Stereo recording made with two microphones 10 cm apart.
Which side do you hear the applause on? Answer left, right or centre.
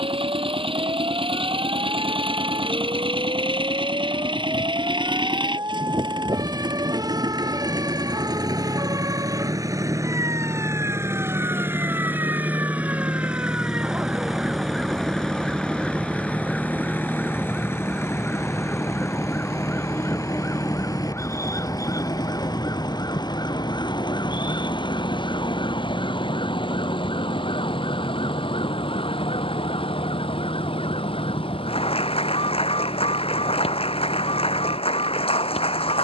left.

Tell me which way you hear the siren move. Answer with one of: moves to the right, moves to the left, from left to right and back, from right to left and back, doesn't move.
moves to the left.